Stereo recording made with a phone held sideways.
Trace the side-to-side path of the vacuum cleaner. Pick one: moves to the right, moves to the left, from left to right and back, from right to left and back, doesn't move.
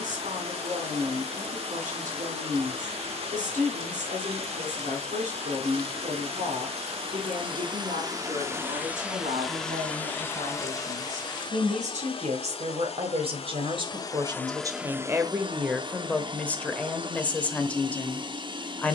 from right to left and back.